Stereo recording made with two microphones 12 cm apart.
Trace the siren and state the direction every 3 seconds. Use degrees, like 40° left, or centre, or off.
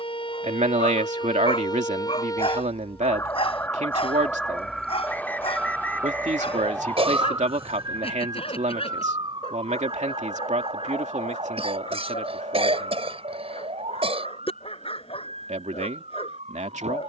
40° left, 10° left, 30° right, 50° right, 60° right, 60° right.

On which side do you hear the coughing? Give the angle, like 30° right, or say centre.
50° right.